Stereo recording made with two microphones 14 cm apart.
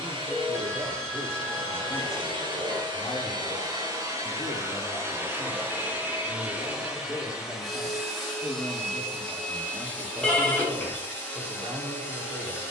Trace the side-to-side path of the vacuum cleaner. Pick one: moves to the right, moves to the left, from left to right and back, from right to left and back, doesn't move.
moves to the left.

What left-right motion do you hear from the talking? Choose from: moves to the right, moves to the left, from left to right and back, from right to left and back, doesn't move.
from right to left and back.